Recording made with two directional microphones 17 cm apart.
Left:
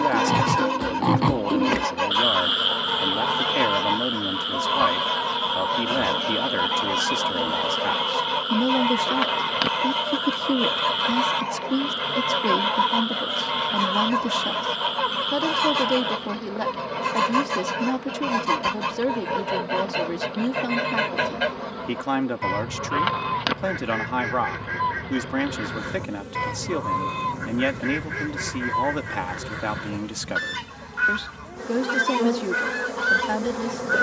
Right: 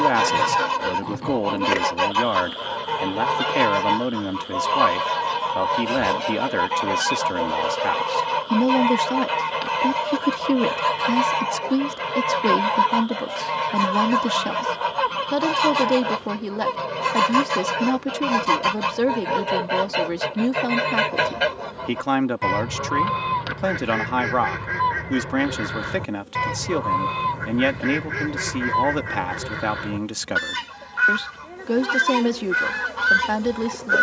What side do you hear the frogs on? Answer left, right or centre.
left.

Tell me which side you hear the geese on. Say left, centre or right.
right.